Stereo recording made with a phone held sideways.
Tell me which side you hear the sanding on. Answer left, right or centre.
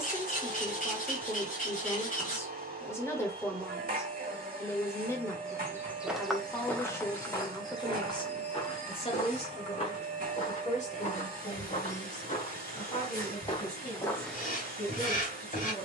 left.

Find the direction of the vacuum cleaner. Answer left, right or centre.
right.